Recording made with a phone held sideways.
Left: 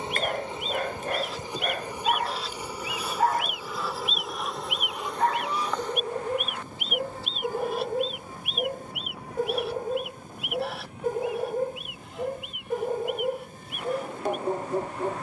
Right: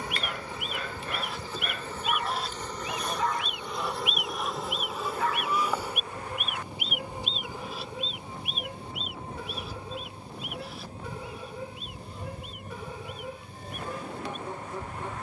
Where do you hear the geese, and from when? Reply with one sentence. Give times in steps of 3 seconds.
You can hear the geese on the right from 0 s, in the centre from 3 s and on the left from 6 s.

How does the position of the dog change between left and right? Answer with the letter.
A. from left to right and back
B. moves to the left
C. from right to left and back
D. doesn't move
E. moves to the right
D.